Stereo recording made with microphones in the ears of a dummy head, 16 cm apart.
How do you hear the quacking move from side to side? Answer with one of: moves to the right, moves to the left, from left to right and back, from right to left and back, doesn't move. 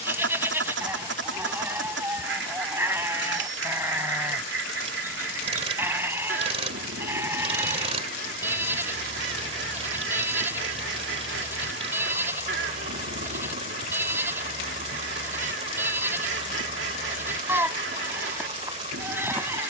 doesn't move.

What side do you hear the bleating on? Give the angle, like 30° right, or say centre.
10° right.